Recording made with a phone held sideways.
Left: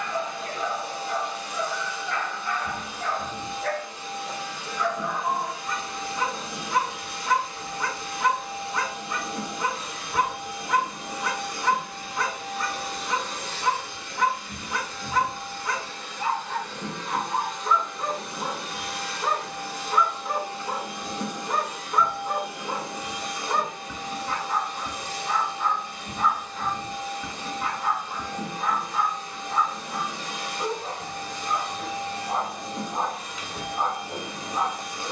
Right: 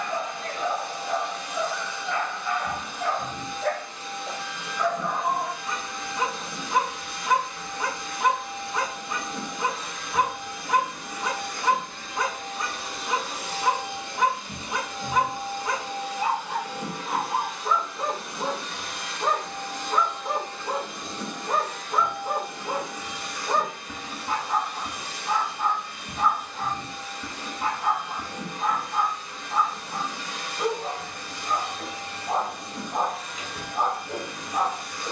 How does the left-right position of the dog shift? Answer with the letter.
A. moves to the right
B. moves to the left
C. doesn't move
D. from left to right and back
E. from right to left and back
C.